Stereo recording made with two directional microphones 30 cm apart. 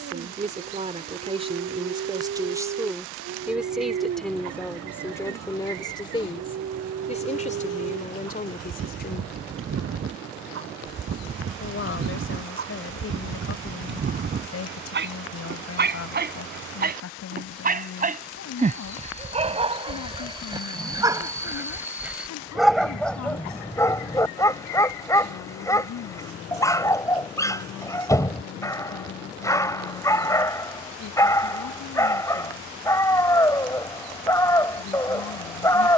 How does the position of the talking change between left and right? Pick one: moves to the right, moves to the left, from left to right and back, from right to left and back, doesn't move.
moves to the left.